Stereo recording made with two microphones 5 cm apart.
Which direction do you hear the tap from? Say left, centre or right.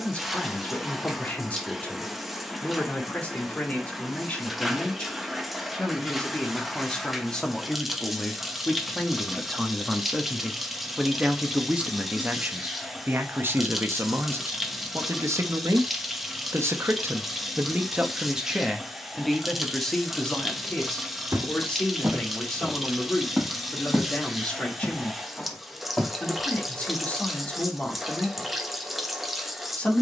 centre.